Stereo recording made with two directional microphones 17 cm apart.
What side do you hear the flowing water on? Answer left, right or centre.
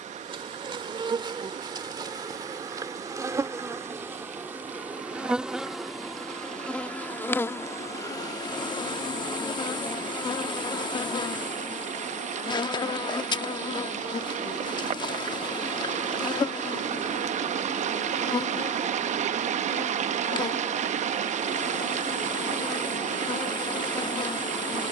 right.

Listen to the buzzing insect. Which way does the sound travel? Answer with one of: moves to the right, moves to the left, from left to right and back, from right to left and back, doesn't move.
moves to the left.